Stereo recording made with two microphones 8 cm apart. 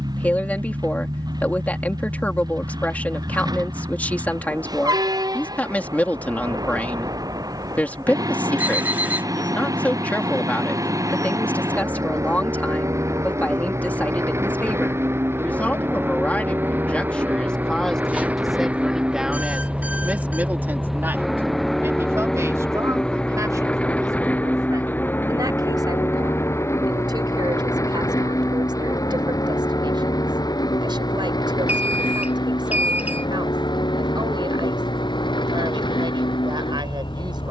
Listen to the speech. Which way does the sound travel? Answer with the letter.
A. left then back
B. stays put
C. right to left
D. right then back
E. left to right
E.